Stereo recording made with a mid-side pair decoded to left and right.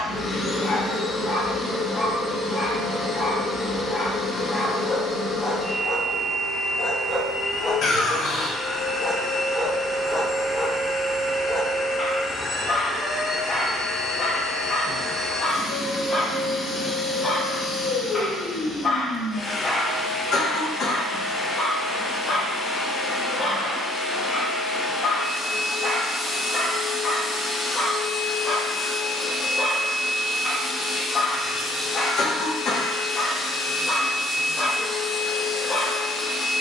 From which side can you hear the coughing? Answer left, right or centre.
left.